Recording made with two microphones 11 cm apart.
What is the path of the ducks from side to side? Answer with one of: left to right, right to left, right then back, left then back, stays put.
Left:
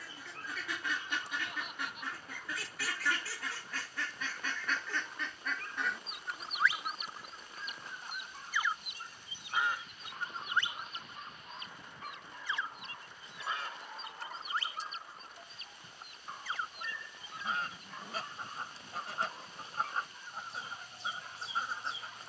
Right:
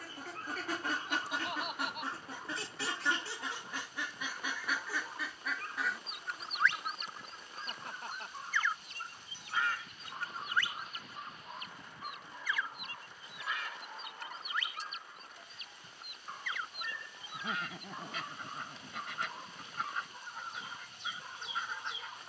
right to left.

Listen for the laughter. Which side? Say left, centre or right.
right.